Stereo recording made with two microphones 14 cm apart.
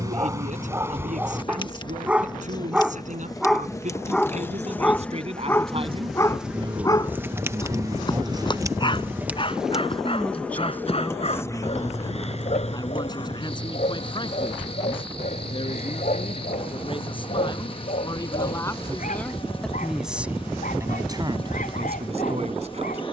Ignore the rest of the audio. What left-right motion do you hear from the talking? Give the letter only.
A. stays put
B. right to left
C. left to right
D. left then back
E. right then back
D.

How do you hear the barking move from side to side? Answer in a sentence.
You can hear the barking travel towards the left.